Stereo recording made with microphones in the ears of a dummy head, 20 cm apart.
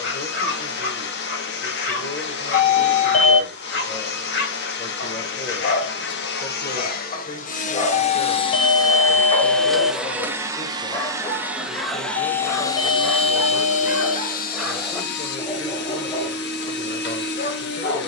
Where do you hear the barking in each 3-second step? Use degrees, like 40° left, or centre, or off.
50° left, 40° left, 30° left, 10° left, centre, 30° left.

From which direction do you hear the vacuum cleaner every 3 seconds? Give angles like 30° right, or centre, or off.
50° left, 50° left, 40° left, centre, 30° left, 50° left.